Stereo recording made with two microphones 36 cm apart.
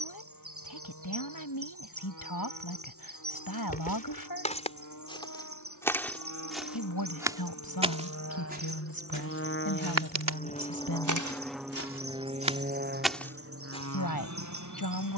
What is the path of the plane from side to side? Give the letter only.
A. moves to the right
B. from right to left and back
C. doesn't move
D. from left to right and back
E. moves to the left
A.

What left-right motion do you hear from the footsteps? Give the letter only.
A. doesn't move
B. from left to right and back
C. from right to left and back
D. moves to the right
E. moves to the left
B.